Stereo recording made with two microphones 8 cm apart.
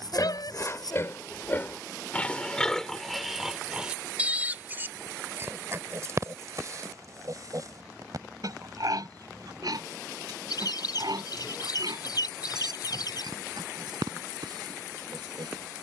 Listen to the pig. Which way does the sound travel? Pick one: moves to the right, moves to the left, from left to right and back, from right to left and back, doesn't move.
moves to the right.